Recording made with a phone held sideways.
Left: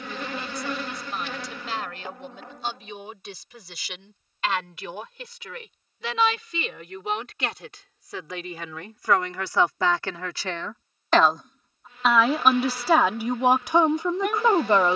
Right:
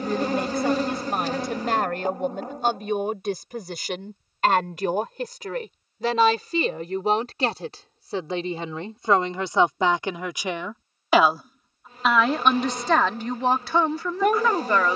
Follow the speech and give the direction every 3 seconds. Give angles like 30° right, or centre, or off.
50° right, 50° right, 40° right, 20° right, 10° left.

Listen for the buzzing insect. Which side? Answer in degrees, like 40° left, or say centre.
40° right.